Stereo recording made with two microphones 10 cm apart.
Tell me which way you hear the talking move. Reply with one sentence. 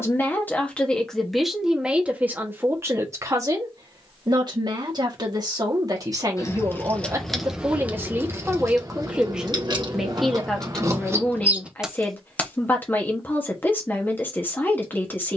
In this clip you hear the talking go right and come back.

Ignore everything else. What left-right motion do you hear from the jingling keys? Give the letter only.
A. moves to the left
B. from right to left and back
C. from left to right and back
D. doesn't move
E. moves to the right
C.